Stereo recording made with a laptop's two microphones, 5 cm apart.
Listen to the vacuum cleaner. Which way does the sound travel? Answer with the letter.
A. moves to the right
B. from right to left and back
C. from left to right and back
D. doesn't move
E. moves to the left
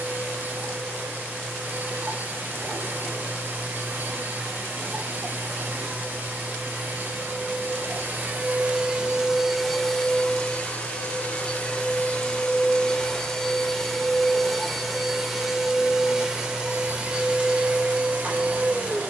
B.